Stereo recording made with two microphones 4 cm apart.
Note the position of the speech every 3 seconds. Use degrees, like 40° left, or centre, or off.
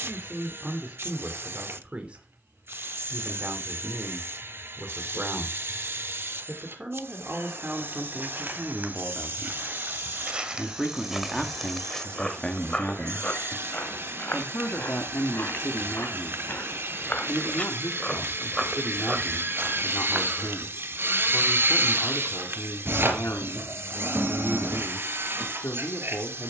30° right, 30° right, 20° right, centre, 30° left, 60° left, 70° left, 70° left, 70° left.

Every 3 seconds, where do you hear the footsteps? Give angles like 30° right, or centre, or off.
off, off, 50° right, 20° right, 30° left, 50° left, 20° right, off, off.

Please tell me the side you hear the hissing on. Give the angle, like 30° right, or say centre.
70° right.